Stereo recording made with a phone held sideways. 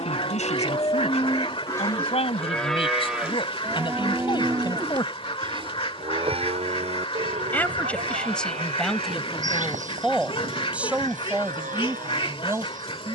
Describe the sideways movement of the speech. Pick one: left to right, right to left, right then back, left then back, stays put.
left to right.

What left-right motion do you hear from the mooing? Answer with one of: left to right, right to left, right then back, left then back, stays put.
left to right.